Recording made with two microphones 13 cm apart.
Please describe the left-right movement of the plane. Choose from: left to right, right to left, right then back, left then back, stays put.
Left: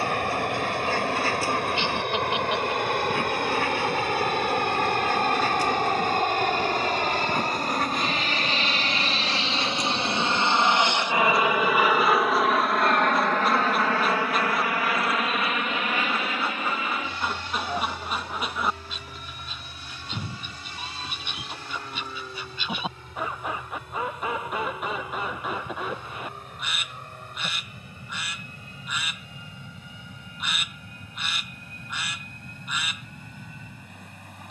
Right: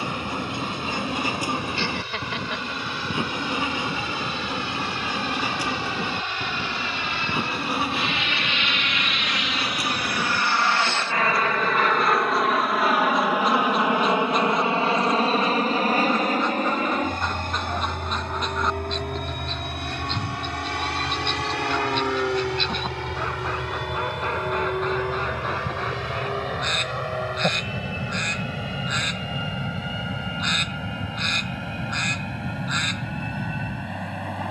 left to right.